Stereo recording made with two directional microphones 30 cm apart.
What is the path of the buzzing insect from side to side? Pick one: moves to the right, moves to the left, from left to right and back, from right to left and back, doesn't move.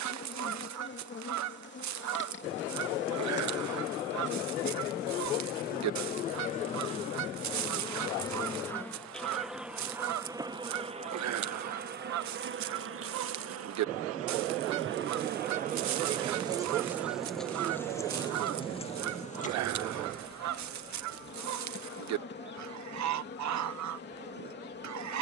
from left to right and back.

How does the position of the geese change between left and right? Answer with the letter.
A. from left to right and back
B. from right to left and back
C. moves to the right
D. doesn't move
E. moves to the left
D.